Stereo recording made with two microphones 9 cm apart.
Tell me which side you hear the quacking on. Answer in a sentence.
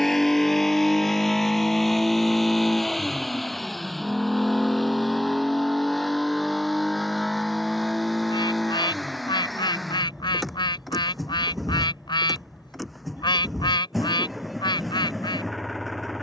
You can hear the quacking on the left.